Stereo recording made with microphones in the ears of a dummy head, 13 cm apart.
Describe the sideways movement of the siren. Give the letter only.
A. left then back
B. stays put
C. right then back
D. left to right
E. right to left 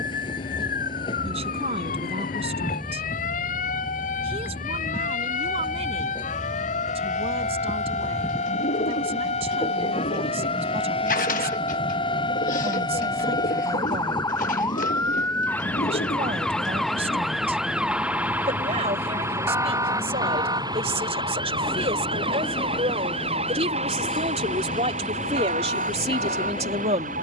D.